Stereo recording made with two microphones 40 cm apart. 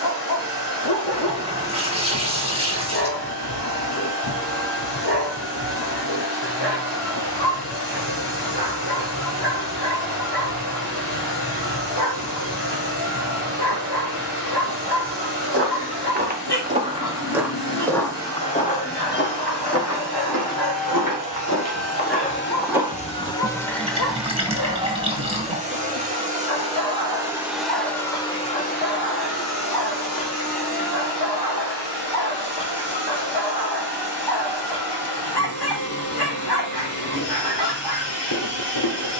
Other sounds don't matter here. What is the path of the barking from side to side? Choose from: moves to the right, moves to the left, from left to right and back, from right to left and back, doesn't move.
doesn't move.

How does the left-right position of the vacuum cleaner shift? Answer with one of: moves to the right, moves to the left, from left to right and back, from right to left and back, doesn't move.
from left to right and back.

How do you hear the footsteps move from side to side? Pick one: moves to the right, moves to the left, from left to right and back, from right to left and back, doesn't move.
from right to left and back.